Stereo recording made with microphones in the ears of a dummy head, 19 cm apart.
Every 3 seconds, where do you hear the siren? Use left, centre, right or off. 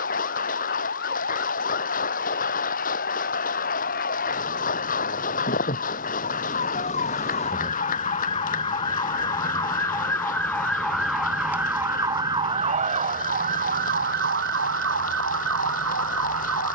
left, left, left, centre, right, right.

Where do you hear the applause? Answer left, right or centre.
left.